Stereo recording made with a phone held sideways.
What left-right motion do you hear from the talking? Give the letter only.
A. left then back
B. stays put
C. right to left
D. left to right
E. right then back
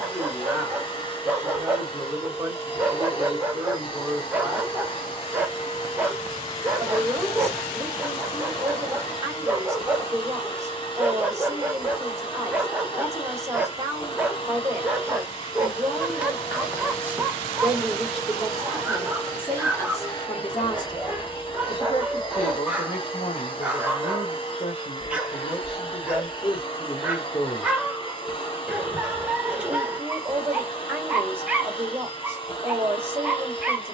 A.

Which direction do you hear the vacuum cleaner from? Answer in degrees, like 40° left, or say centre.
30° left.